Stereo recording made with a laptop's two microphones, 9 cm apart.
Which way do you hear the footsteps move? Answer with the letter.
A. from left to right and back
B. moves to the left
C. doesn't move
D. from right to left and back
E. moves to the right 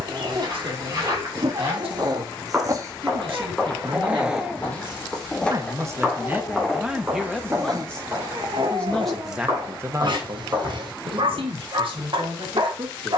D.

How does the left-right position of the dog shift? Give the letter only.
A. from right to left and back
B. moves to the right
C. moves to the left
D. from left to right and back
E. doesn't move
A.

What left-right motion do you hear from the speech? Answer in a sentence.
You can hear the speech move from right to left and back again.